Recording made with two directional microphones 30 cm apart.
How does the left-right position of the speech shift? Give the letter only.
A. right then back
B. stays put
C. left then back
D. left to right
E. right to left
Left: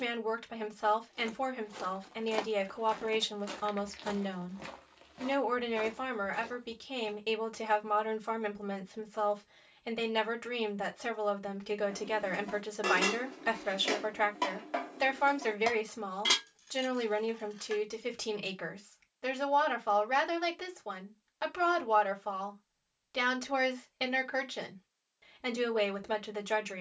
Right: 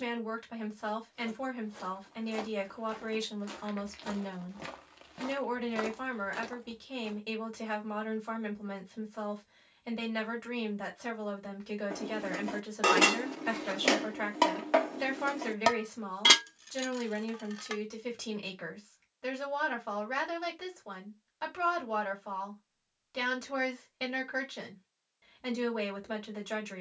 B.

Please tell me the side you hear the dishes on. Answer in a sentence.
In this clip you hear the dishes on the right.